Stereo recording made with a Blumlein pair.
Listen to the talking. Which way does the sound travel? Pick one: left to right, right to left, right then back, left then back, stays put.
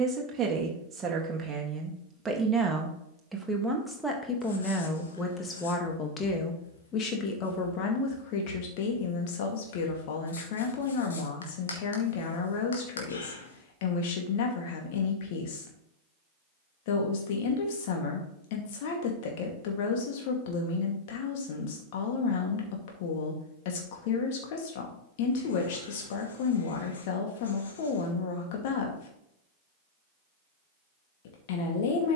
right to left.